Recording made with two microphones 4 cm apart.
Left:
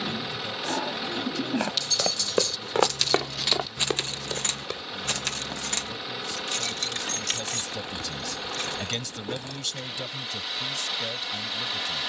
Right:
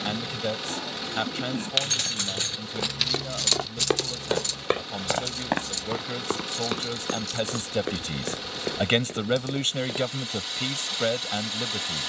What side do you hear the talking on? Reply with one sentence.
You can hear the talking on the right.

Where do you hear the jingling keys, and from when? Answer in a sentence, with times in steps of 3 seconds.
You can hear the jingling keys on the right from 0 s and on the left from 3 s.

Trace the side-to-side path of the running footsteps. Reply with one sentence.
In this clip you hear the running footsteps move to the right.